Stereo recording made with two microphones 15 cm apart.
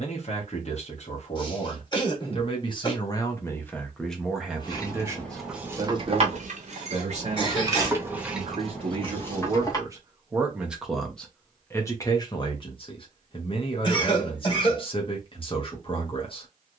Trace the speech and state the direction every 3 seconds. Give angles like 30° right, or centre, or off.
40° left, centre, 40° right, 10° right, 30° left, 40° left.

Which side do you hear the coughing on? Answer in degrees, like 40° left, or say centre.
30° left.